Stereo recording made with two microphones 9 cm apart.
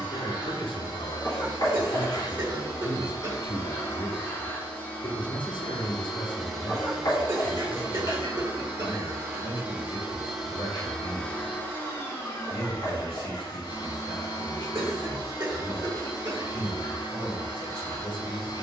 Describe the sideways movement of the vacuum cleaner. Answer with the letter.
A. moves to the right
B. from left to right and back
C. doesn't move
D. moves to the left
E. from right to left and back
B.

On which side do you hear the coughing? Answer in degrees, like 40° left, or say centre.
40° right.